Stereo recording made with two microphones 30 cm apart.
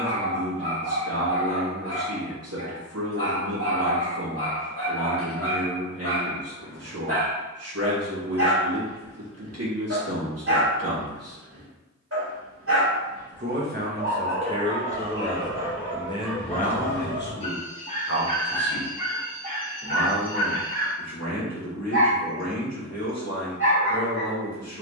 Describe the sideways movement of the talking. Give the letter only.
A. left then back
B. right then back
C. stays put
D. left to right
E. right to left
E.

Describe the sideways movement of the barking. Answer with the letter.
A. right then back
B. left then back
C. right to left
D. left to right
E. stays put
B.